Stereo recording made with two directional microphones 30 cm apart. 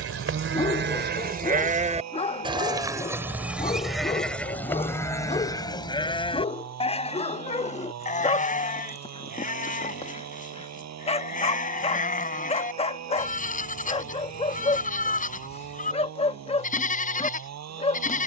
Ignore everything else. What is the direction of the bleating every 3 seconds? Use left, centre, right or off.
right, centre, left, left, left, left.